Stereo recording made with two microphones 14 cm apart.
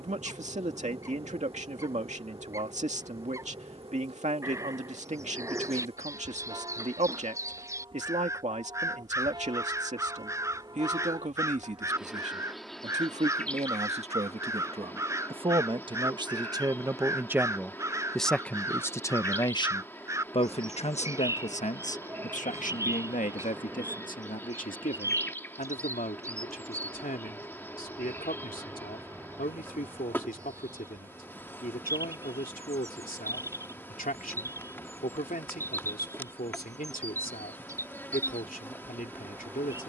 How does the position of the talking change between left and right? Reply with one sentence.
In this clip you hear the talking move from right to left.